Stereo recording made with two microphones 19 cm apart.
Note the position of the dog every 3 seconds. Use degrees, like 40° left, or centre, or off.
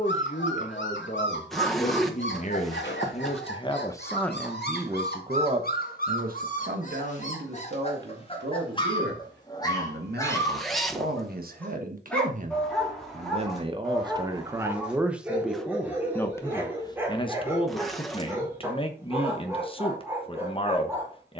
80° left, 60° left, 40° left, 20° left, centre, 10° right, 10° right.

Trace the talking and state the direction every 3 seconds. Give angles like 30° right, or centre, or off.
40° left, centre, 60° right, 60° right, 30° right, 10° left, 30° left.